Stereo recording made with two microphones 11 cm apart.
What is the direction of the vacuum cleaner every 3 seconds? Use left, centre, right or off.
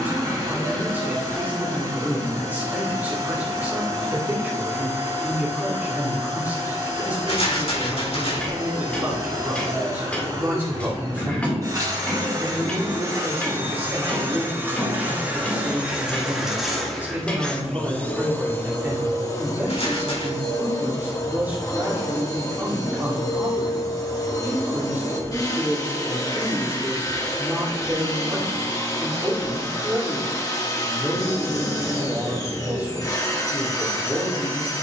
right, right, right, right, right, centre, left, left, left, left, left, left.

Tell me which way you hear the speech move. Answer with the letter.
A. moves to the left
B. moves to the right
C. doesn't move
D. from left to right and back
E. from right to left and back
C.